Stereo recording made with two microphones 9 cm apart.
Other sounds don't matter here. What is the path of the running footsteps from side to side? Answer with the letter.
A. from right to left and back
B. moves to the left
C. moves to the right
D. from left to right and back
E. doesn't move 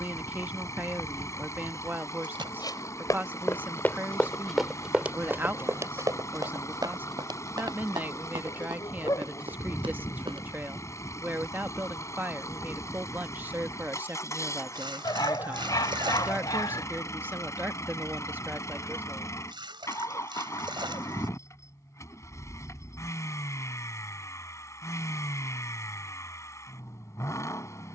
C.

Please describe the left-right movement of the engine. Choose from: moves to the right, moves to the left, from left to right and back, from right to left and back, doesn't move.
doesn't move.